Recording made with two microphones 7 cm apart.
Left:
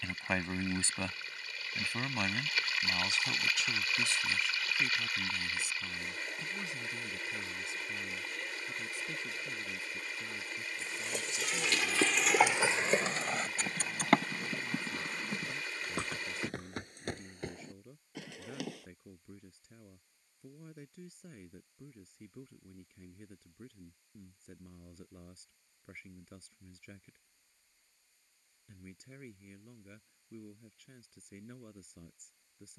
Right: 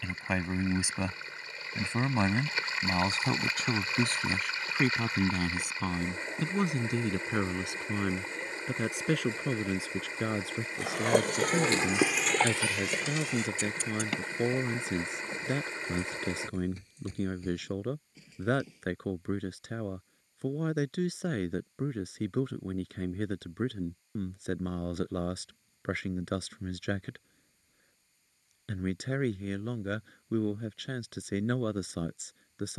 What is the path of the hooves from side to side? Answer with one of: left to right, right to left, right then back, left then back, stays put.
right to left.